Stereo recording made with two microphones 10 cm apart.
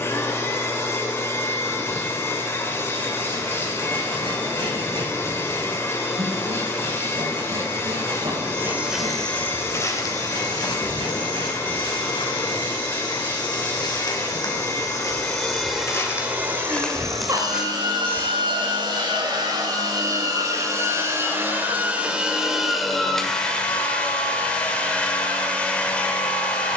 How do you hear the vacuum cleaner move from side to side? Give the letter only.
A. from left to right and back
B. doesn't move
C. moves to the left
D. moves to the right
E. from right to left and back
A.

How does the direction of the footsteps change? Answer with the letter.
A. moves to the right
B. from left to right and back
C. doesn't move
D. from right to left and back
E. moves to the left
D.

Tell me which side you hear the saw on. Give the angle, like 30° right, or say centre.
70° right.